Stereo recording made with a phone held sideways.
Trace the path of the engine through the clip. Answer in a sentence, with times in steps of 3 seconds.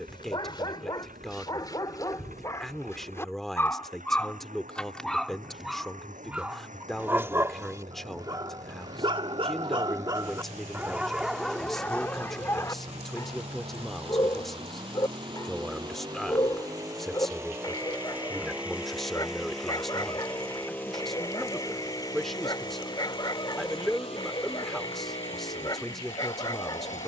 In this clip you hear the engine on the right from 0 s, in the centre from 18 s and on the left from 21 s.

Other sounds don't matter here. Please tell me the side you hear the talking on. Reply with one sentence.
You can hear the talking in the centre.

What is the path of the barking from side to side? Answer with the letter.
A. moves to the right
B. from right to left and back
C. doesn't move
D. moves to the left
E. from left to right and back
E.